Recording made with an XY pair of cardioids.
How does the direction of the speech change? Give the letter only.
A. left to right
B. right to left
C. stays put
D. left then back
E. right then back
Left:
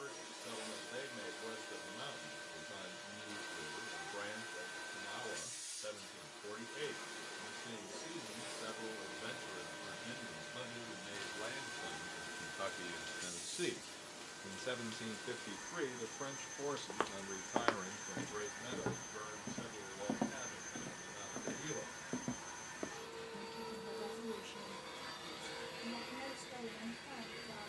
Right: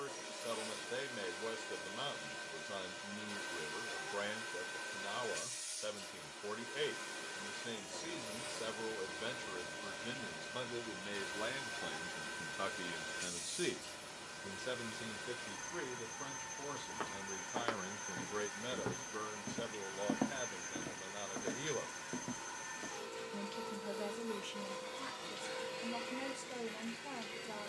D.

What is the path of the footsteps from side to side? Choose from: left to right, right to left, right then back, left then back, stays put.
right then back.